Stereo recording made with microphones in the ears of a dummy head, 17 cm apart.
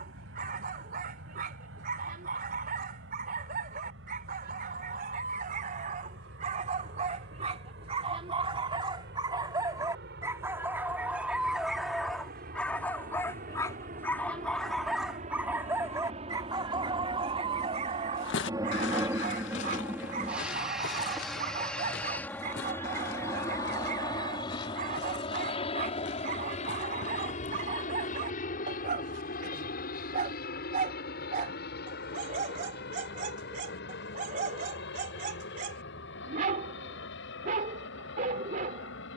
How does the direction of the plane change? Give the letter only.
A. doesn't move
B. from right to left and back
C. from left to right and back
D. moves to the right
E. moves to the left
E.